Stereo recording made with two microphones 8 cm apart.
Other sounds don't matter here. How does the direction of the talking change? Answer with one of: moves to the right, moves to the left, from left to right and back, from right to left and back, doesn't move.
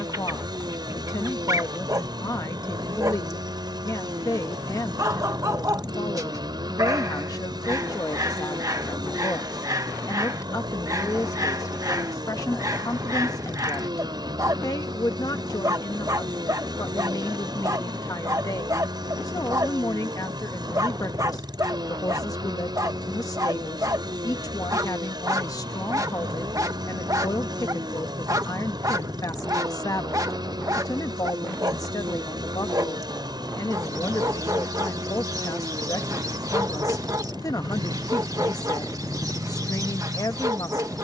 doesn't move.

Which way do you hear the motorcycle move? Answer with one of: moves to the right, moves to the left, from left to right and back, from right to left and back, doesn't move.
doesn't move.